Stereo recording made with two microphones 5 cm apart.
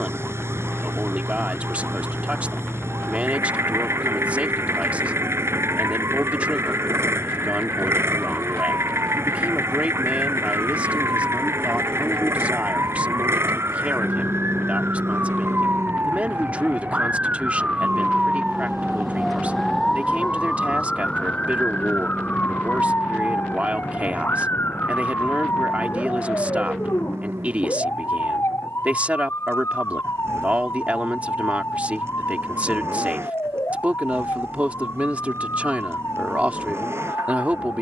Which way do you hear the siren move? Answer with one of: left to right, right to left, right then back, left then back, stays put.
right to left.